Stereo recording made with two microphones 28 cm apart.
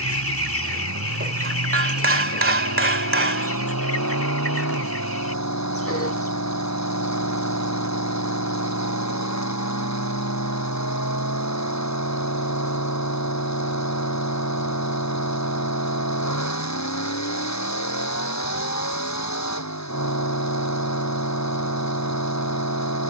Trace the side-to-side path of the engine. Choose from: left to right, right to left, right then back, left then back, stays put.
stays put.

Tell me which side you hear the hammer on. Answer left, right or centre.
right.